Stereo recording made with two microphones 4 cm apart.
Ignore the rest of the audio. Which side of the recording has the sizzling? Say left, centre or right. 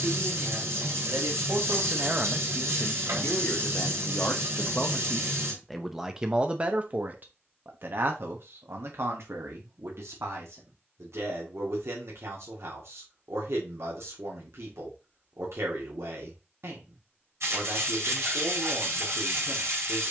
right.